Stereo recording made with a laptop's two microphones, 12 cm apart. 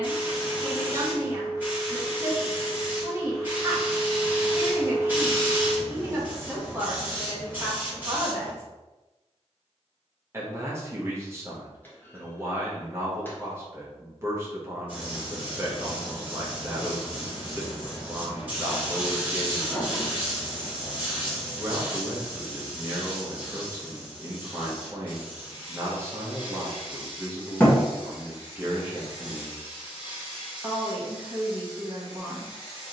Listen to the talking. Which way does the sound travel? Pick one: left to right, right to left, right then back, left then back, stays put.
stays put.